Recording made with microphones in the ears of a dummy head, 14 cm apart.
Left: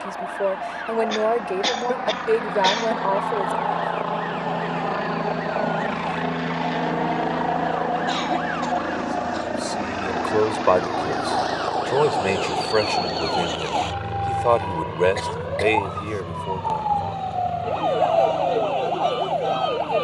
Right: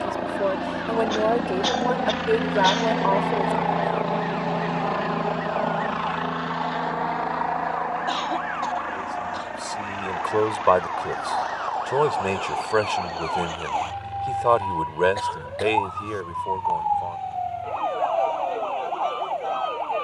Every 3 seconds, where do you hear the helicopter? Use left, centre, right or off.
right, centre, left, left, left, left, left.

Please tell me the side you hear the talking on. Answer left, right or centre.
centre.